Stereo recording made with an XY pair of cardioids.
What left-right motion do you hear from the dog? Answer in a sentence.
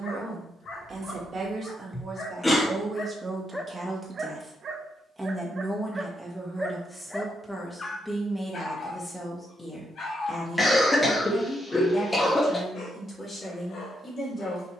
You can hear the dog go right and come back.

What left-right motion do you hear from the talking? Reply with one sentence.
You can hear the talking move from right to left.